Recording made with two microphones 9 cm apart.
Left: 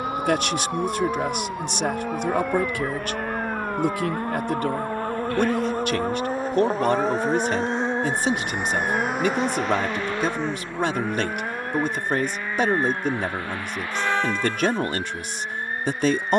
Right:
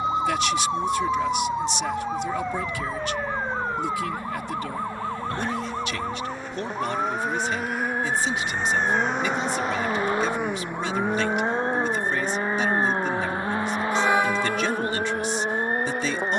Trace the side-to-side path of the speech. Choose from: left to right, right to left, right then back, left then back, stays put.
stays put.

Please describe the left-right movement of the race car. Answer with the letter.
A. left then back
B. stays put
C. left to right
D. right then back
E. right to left
C.